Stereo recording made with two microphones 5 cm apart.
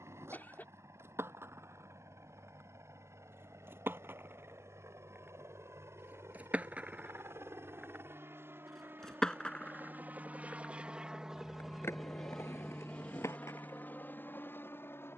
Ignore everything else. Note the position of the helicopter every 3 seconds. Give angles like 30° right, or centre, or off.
70° right, 70° right, 60° right, 30° right, 30° left.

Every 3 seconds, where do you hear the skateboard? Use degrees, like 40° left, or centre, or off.
60° right, 50° right, 20° right, 30° left, 60° left.